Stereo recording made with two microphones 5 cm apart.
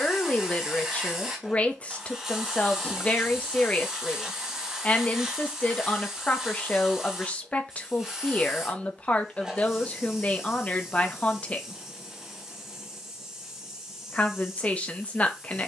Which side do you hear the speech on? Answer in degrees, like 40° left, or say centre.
30° left.